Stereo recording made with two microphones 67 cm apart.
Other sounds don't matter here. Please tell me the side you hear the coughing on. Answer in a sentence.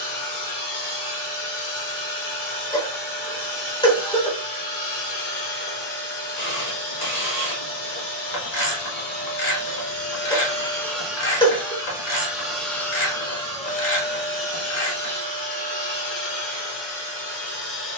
In this clip you hear the coughing in the centre.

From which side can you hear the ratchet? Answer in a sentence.
You can hear the ratchet on the left.